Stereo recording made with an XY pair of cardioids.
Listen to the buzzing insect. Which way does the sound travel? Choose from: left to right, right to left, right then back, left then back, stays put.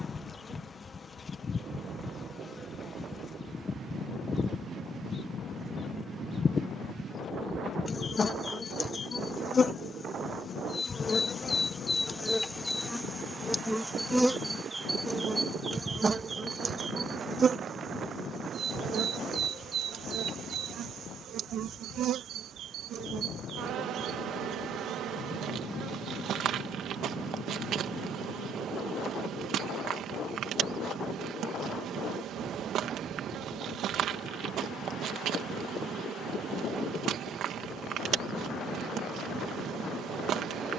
left to right.